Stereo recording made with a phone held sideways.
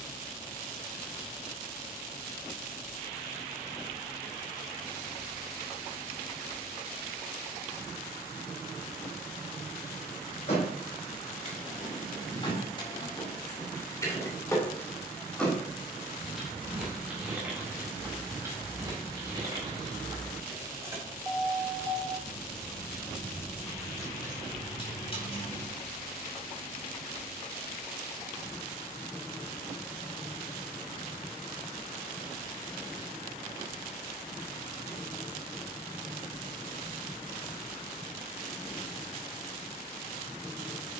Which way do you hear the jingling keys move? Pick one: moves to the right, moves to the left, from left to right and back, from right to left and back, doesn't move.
from left to right and back.